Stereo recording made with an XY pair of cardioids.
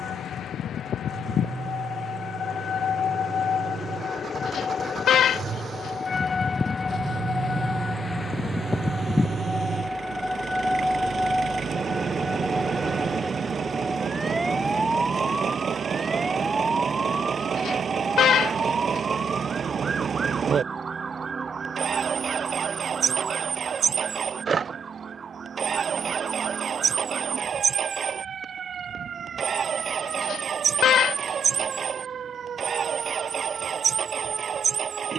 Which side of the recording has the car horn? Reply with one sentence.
You can hear the car horn on the left.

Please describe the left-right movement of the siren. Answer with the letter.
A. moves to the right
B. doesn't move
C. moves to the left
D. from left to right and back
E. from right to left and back
A.